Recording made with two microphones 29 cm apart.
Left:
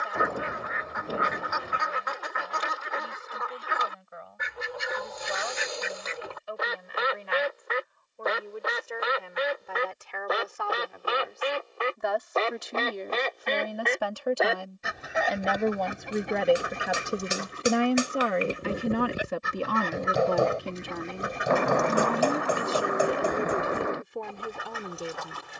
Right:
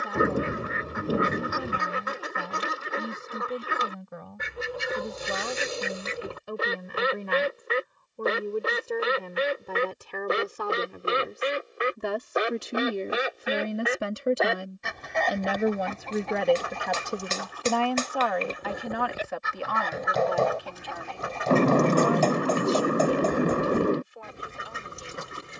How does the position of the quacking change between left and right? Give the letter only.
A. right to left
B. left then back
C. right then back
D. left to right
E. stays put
B.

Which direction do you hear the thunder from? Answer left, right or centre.
right.